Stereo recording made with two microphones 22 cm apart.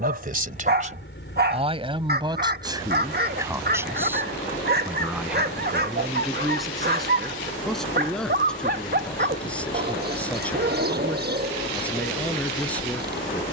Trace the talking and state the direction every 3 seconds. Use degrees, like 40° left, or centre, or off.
30° right, 10° right, centre, 10° left, 10° left.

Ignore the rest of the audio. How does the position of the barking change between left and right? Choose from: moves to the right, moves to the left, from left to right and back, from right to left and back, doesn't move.
doesn't move.